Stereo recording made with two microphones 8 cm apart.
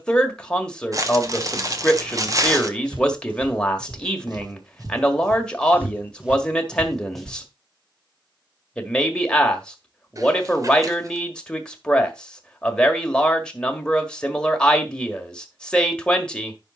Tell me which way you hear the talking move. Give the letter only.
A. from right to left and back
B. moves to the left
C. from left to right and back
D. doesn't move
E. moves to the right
D.